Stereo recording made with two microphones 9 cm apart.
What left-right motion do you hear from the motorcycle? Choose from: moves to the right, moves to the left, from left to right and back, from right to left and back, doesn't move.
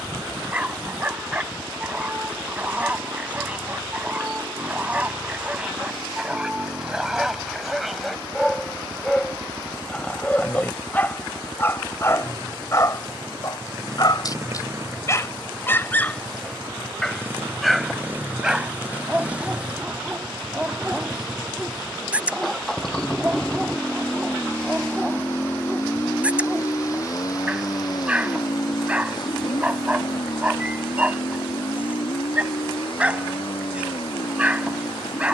moves to the left.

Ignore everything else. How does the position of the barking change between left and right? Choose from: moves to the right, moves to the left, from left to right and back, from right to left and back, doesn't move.
from right to left and back.